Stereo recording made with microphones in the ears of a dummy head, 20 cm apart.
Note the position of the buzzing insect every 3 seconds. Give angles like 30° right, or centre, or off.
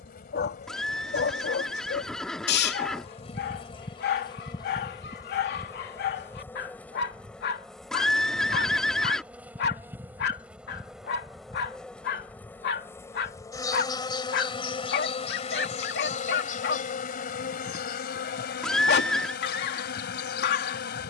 40° left, 20° left, centre, centre, 20° left, 40° left, 50° left.